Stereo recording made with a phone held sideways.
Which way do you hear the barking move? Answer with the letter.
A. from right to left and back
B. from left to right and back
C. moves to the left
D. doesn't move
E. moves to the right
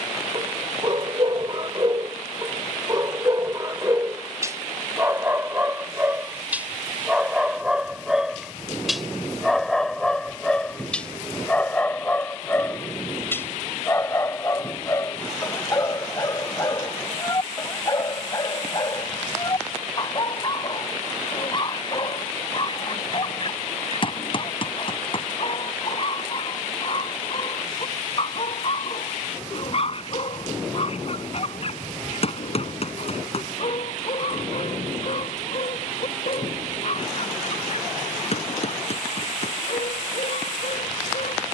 C.